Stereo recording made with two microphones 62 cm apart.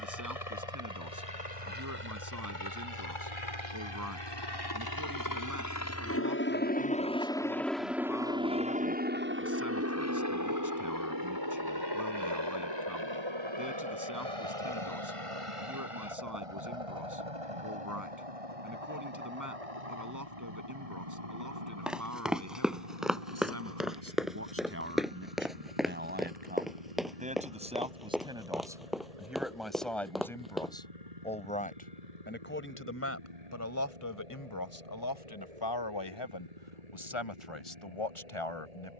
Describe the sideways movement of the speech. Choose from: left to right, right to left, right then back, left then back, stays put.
right to left.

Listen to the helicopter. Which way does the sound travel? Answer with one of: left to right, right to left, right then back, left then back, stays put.
left to right.